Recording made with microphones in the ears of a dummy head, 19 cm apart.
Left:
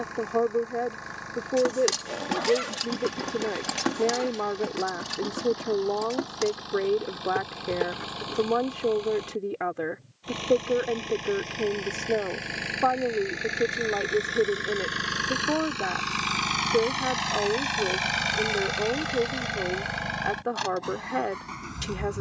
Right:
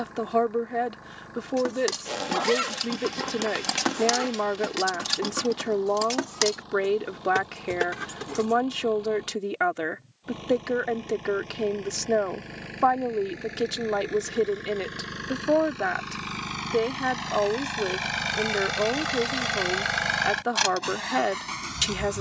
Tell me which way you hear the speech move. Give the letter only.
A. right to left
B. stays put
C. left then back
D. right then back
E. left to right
B.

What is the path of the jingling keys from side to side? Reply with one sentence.
In this clip you hear the jingling keys go from the left side to the right.